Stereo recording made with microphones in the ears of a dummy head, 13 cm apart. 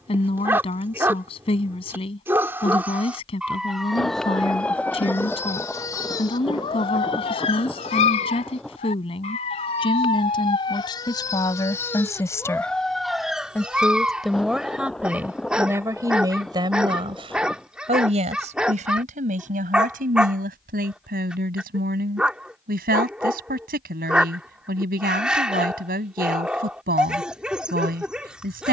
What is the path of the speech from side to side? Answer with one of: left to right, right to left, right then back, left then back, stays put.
left to right.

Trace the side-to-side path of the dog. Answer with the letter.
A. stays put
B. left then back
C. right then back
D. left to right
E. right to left
B.